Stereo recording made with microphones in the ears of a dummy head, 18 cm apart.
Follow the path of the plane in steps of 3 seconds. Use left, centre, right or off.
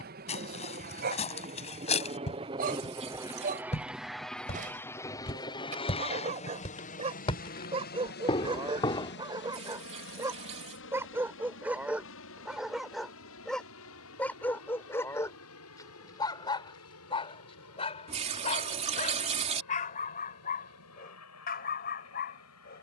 right, centre, left, left, left, left, left, left.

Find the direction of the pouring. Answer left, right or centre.
right.